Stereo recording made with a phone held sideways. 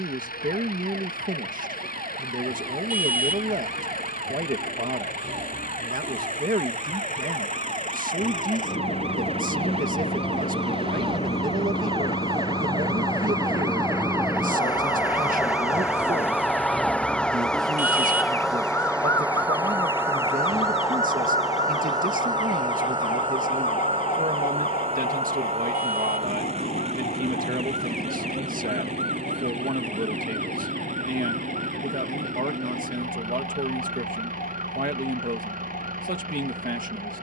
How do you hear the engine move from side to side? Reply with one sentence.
You can hear the engine go from the left side to the right.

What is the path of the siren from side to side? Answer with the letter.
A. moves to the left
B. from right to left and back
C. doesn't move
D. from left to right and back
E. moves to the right
A.